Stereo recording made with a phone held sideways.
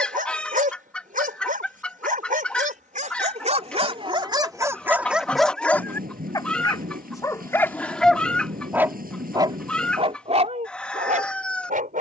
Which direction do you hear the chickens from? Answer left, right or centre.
centre.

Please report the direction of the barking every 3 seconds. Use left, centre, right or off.
right, right, centre, right.